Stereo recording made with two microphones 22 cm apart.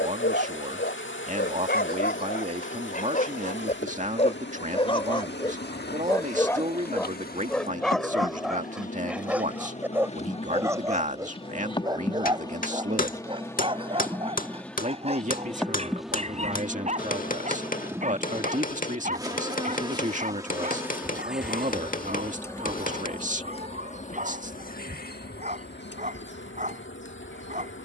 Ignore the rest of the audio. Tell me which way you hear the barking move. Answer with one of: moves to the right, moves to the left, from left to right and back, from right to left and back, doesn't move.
moves to the right.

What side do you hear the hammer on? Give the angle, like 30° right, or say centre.
40° left.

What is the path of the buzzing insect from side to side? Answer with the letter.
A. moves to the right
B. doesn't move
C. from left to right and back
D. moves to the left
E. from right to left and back
C.